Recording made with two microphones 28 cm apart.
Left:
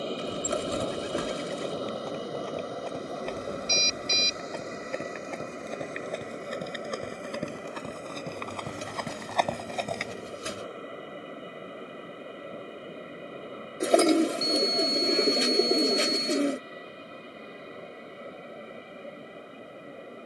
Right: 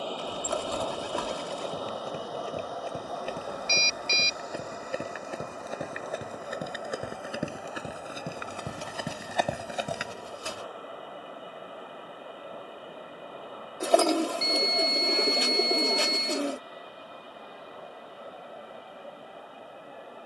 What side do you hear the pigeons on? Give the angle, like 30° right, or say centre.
20° left.